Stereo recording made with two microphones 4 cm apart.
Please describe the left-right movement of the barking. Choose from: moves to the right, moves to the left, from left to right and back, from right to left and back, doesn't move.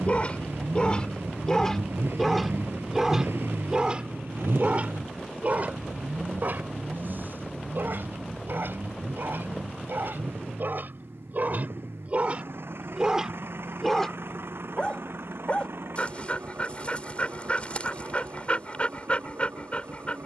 from left to right and back.